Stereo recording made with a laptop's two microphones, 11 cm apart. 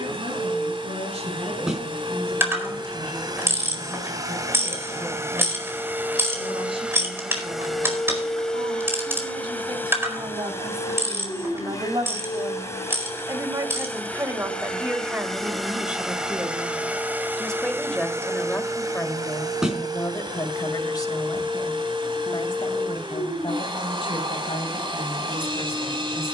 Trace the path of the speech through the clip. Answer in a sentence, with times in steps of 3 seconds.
In this clip you hear the speech on the right from 0 s, in the centre from 15 s and on the left from 18 s.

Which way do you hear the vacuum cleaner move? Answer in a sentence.
You can hear the vacuum cleaner move from right to left and back again.